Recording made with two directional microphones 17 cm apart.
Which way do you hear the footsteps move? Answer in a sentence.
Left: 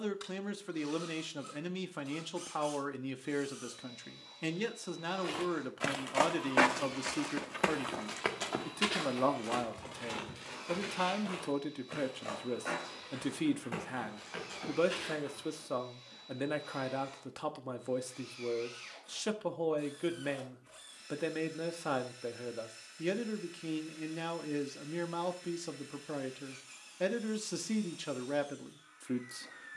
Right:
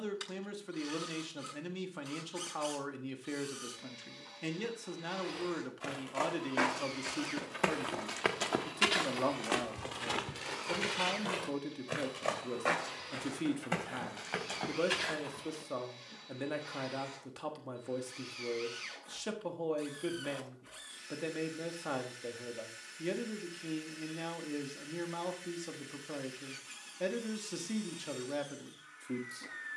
In this clip you hear the footsteps move from left to right.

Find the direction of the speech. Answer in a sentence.
In this clip you hear the speech on the left.